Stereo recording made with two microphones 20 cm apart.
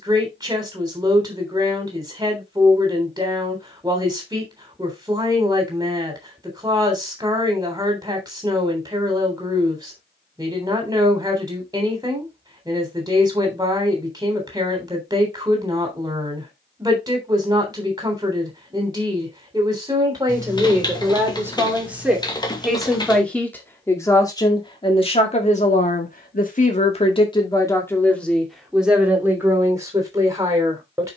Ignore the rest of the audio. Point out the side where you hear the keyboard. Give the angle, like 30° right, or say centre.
20° left.